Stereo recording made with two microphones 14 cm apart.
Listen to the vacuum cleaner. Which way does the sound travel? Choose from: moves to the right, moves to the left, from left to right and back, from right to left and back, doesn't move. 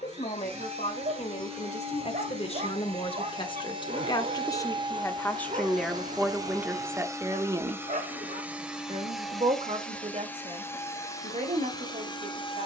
moves to the left.